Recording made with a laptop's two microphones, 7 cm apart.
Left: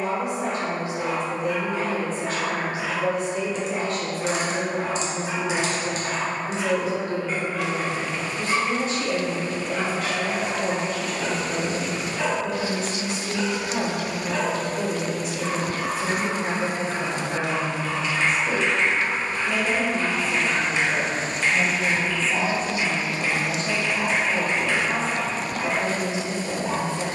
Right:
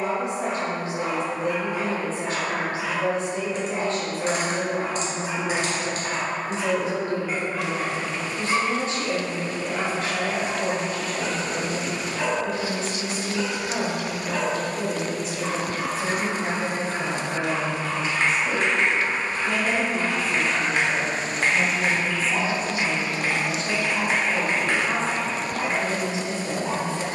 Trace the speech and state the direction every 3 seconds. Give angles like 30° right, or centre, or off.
40° right, 40° right, 40° right, 40° right, 40° right, 40° right, 30° right, centre, 30° right.